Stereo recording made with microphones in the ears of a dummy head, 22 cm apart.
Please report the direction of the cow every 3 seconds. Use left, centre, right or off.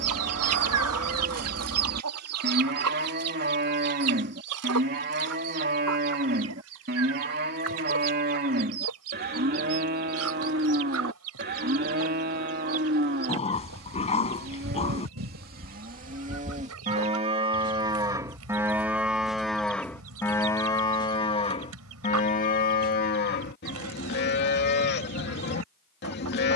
right, right, right, right, right, right, centre, left, left.